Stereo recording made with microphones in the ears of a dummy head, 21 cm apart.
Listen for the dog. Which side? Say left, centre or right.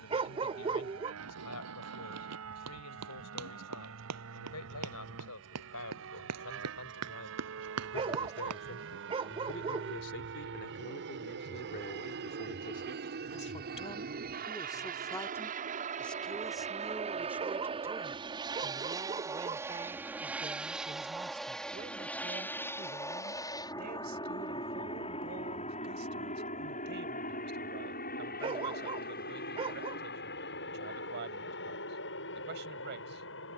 right.